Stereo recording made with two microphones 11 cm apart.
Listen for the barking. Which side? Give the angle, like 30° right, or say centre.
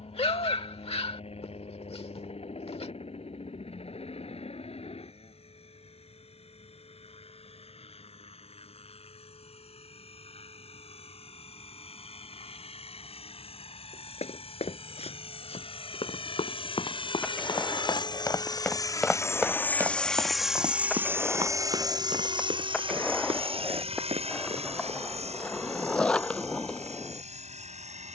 60° left.